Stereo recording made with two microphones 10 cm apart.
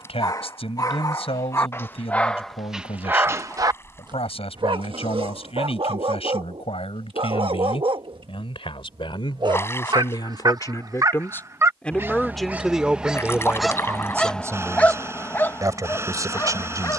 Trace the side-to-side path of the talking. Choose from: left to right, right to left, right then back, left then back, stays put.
left to right.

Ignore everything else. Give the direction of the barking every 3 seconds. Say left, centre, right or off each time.
left, right, right, right, centre, left.